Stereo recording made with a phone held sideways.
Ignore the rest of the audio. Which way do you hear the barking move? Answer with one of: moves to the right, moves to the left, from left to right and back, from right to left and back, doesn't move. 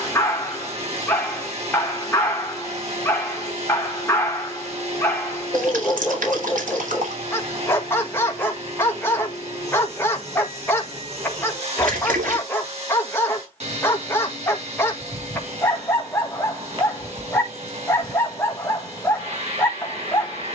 doesn't move.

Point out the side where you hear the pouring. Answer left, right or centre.
right.